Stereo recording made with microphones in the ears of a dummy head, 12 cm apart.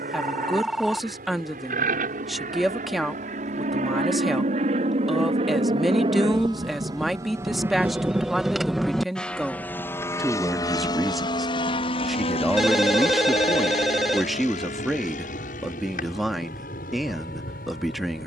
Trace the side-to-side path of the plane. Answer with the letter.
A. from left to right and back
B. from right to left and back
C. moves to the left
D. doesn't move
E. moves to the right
C.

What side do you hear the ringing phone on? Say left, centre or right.
centre.